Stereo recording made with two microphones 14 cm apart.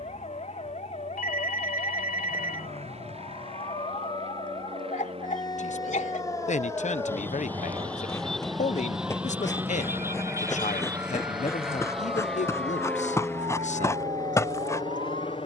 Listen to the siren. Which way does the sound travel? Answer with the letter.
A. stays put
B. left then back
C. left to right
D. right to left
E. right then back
C.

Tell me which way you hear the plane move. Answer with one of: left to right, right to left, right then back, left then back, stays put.
right to left.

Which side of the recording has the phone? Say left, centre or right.
left.